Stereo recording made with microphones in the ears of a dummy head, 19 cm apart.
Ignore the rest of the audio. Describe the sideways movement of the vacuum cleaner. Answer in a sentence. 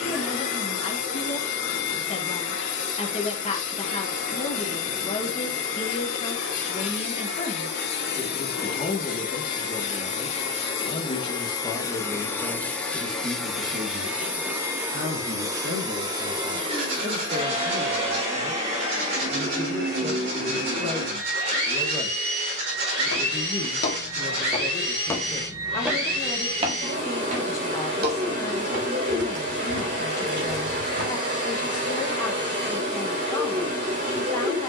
You can hear the vacuum cleaner go from the left side to the right.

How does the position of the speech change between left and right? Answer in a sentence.
In this clip you hear the speech move from left to right and back again.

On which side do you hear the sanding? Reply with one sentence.
You can hear the sanding on the right.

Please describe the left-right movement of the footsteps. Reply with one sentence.
You can hear the footsteps travel towards the right.